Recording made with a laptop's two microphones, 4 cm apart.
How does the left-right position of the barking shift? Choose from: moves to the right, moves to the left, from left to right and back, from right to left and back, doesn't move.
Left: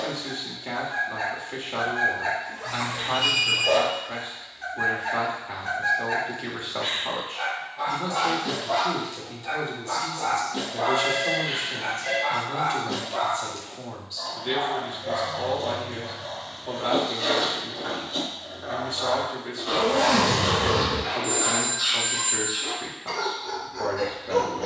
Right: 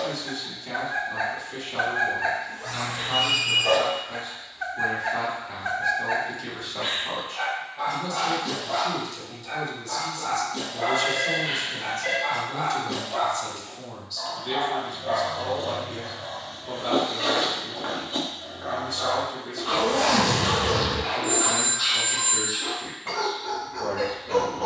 from right to left and back.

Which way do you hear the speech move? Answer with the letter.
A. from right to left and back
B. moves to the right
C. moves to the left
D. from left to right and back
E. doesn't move
E.